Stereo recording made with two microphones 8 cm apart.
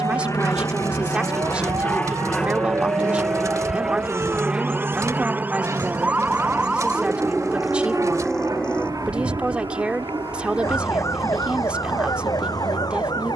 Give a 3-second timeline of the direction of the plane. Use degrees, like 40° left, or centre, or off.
20° left, 10° right, 30° right, 40° right, 50° right.